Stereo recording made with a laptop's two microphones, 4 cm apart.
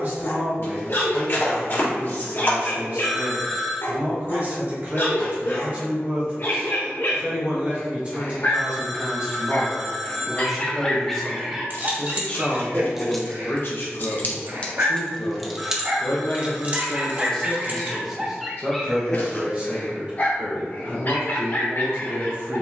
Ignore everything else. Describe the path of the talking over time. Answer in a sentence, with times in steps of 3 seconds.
In this clip you hear the talking on the right from 0 s, in the centre from 9 s, on the left from 12 s and on the right from 18 s.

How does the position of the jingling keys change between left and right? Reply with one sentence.
You can hear the jingling keys move from right to left and back again.